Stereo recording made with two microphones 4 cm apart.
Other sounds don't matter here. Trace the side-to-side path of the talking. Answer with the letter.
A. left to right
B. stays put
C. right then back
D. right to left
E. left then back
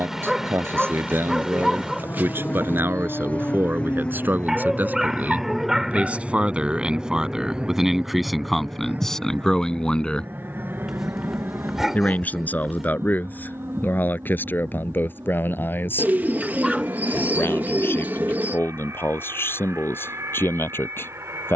D.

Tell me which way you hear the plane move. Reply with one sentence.
In this clip you hear the plane go from the left side to the right.